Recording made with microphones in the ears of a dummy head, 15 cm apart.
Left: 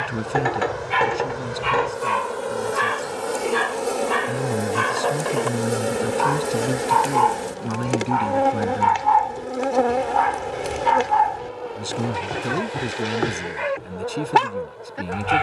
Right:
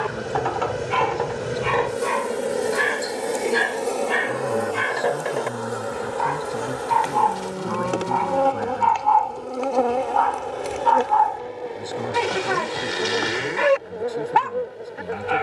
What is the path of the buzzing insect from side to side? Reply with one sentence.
You can hear the buzzing insect go left and come back.